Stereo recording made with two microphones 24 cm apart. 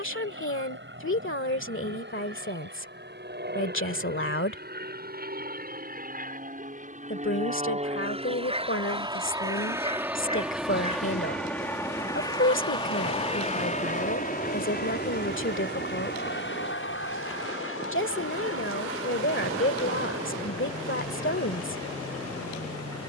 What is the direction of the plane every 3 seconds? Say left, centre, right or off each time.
right, right, right, centre, left, left, left, left.